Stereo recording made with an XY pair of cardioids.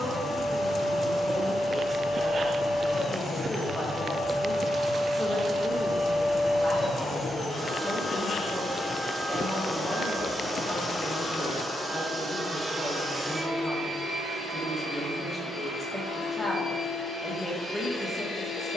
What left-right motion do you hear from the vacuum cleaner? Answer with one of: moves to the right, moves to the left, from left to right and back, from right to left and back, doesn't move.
from left to right and back.